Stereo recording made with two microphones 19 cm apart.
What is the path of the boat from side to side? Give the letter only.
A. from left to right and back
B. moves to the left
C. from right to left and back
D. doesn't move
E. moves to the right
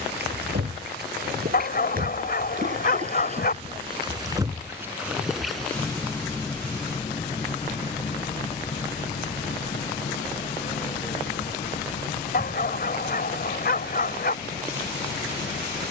B.